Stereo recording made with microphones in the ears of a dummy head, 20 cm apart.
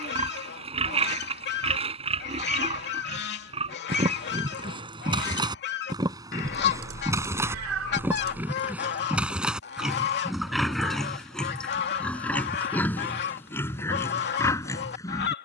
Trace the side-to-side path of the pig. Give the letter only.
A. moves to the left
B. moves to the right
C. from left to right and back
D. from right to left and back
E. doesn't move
A.